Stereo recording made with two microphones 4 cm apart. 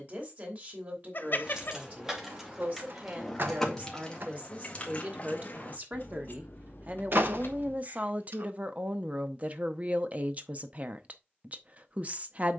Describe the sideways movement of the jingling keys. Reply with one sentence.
In this clip you hear the jingling keys go from the right side to the left.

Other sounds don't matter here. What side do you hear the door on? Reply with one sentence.
You can hear the door on the right.